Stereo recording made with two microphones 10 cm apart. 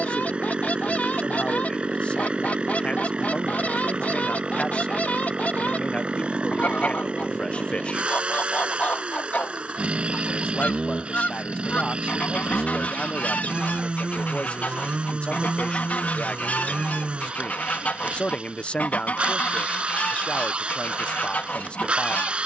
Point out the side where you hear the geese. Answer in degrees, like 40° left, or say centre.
10° left.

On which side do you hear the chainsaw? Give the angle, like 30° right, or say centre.
10° right.